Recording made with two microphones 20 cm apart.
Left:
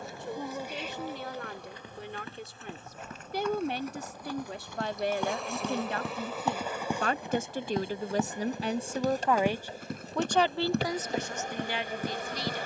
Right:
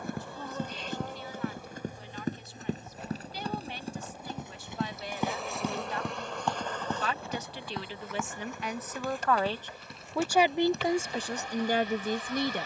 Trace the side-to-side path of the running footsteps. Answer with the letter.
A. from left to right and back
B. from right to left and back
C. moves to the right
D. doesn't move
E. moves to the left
E.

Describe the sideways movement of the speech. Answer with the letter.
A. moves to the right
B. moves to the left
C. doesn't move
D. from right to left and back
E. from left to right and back
A.